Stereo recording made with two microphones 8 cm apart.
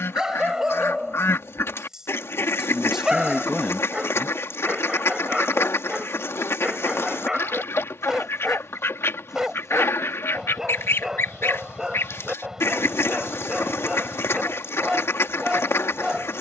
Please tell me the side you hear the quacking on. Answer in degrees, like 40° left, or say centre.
30° left.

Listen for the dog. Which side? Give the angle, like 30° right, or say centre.
10° right.